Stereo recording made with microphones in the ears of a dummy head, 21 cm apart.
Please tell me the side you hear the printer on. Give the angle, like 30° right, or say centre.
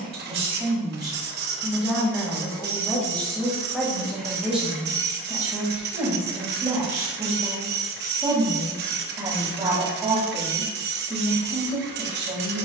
50° right.